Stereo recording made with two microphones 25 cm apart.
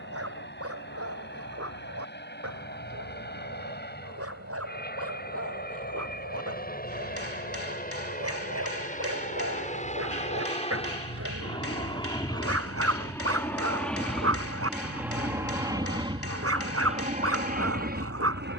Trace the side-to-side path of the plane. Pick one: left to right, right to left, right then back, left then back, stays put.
left to right.